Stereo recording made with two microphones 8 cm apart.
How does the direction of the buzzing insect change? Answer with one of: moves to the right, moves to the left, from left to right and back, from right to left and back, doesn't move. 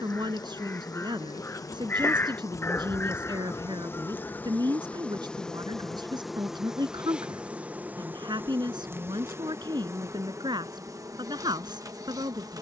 moves to the right.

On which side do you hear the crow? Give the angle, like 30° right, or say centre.
30° left.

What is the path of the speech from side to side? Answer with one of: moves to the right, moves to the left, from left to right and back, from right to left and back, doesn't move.
doesn't move.